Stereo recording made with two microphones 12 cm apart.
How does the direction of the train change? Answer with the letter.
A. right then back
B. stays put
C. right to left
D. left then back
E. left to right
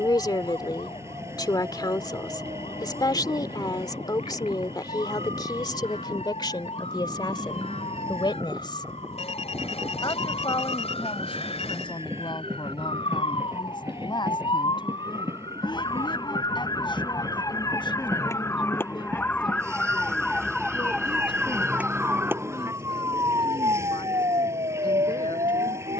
B.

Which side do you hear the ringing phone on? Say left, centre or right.
left.